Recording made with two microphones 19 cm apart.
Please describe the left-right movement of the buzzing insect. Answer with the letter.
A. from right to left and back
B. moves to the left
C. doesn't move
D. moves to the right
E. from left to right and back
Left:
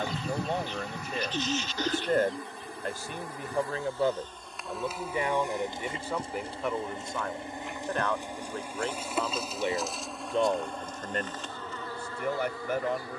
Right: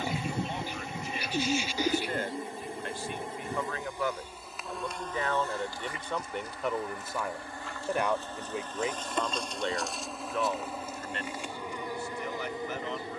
A.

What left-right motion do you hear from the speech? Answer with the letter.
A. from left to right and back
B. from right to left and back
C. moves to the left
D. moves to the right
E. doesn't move
A.